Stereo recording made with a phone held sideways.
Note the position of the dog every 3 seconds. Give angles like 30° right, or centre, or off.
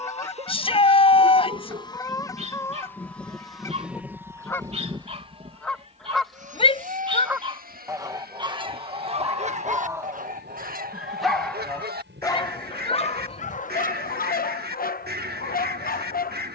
40° right, 40° right, 30° right, 10° right, 50° left, 60° left.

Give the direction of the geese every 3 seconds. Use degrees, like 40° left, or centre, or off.
20° left, 20° left, 20° right, 60° right, 70° right, 70° right.